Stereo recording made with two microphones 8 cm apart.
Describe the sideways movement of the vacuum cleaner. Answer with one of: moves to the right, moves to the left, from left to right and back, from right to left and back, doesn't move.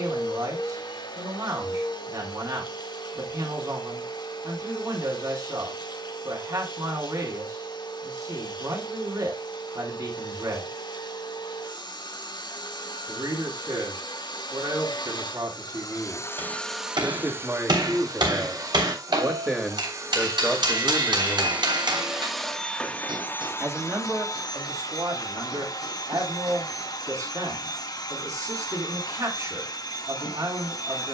from left to right and back.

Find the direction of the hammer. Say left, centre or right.
right.